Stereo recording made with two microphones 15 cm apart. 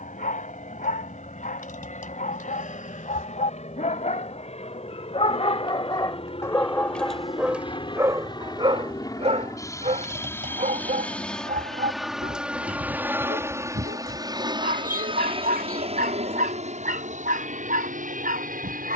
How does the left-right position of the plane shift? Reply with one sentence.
In this clip you hear the plane travel towards the right.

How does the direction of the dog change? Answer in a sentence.
You can hear the dog travel towards the right.